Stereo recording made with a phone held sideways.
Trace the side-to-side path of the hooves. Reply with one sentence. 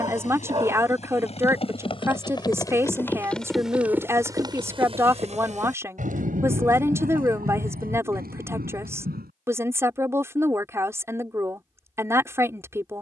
In this clip you hear the hooves go from the left side to the right.